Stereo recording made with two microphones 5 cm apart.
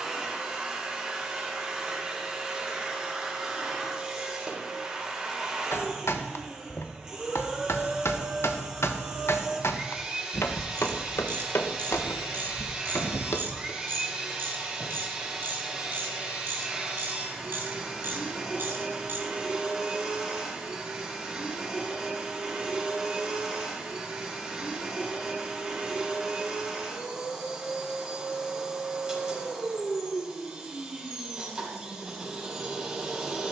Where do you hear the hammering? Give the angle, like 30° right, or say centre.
70° left.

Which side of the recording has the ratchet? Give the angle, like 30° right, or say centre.
50° right.